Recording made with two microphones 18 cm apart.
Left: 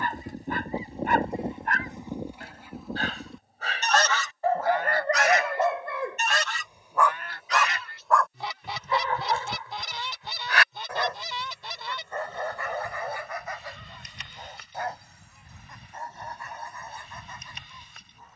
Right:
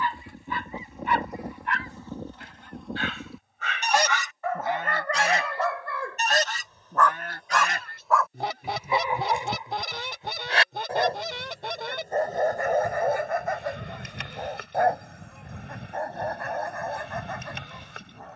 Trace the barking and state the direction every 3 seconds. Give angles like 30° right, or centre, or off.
50° left, 30° left, centre, 30° right, 50° right, 70° right.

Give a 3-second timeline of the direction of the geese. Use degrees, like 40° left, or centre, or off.
20° left, 20° right, 50° right, 60° right, 60° right, 70° right.